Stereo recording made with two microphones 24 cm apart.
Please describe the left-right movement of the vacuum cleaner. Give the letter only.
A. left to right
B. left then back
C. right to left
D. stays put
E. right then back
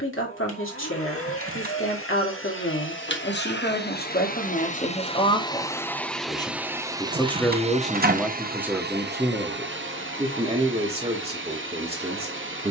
A.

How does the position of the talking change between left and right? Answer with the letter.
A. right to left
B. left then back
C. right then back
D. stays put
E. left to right
E.